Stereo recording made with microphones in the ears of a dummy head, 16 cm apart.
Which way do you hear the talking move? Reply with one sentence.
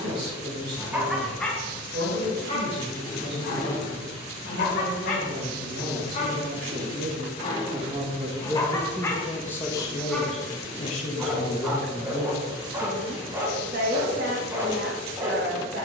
You can hear the talking go left and come back.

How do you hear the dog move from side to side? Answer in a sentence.
You can hear the dog go left and come back.